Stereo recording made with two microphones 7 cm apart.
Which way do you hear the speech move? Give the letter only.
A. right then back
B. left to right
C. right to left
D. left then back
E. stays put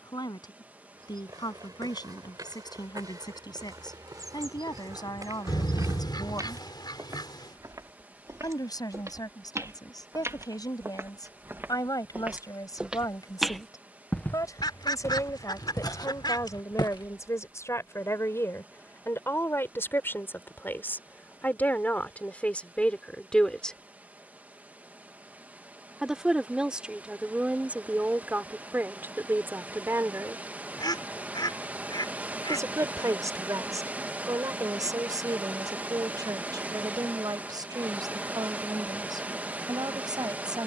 B.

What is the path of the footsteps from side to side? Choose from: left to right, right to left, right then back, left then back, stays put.
right to left.